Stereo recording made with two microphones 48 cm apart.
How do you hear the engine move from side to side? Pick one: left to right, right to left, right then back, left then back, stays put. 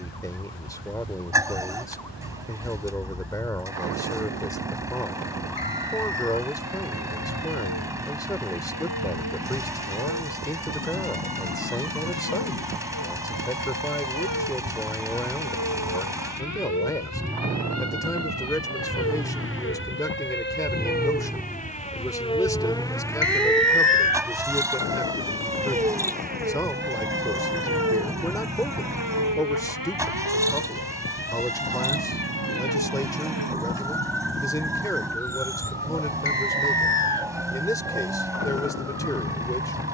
stays put.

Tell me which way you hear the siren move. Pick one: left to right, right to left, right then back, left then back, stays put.
left to right.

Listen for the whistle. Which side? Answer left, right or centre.
left.